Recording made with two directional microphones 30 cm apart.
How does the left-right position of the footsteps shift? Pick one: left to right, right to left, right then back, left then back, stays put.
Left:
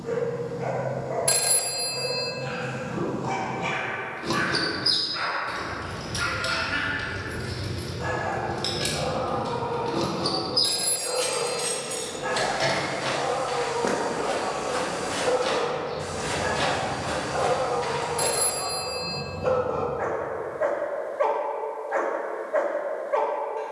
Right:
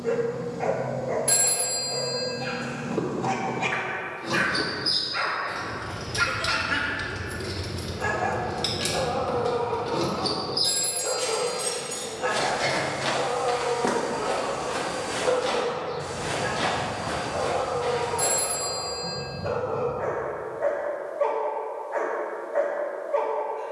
right to left.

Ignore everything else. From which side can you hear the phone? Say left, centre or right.
left.